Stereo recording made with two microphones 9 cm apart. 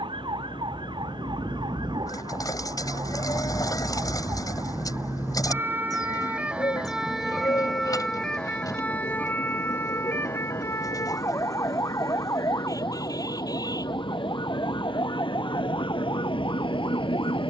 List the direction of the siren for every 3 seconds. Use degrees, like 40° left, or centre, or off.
60° right, 40° right, centre, 30° left, 40° left, 50° left.